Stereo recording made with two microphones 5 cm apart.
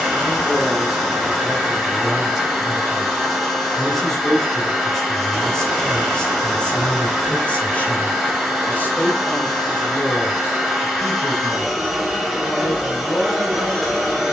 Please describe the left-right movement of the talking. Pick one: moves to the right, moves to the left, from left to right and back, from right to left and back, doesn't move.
moves to the left.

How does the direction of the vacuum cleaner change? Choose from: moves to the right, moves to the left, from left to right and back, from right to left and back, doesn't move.
doesn't move.